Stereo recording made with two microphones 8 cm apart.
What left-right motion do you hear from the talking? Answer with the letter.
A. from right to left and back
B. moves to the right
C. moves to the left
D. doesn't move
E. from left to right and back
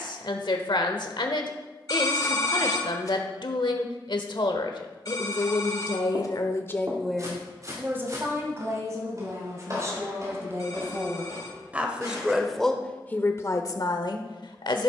E.